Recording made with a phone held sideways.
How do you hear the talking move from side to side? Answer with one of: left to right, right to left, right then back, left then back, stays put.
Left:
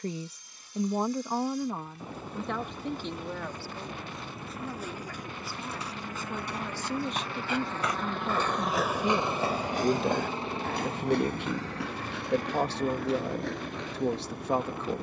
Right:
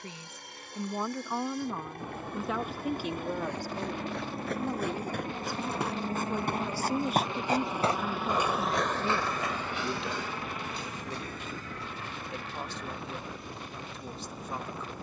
right then back.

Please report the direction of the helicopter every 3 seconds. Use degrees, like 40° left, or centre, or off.
70° right, 50° right, 20° right, 30° left, 50° left.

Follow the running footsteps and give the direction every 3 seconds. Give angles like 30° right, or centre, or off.
off, 70° right, 30° right, 50° left, 80° left.